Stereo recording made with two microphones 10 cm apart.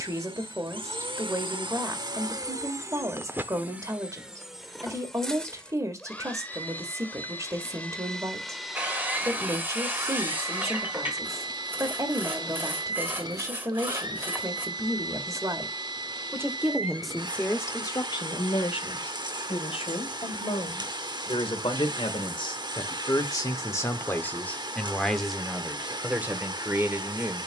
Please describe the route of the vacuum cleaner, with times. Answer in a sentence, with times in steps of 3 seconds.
You can hear the vacuum cleaner on the right from 0 s, in the centre from 3 s and on the right from 9 s.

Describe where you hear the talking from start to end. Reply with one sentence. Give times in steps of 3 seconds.
In this clip you hear the talking on the right from 0 s, in the centre from 15 s, on the left from 18 s and in the centre from 24 s.